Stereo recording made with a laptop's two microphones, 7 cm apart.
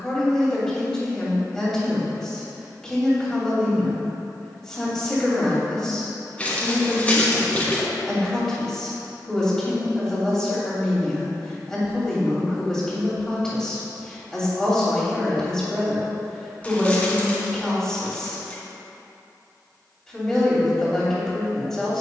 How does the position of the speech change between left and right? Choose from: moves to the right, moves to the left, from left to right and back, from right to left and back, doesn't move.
doesn't move.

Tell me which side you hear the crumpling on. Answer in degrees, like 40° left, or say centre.
20° left.